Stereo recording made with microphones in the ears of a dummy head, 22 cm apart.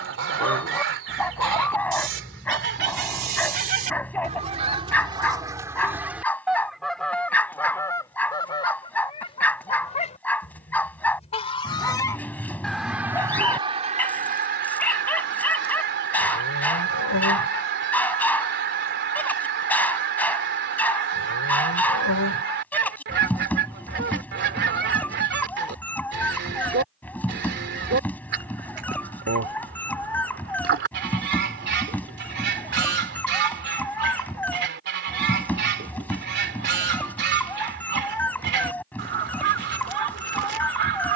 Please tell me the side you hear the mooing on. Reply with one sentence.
In this clip you hear the mooing on the left.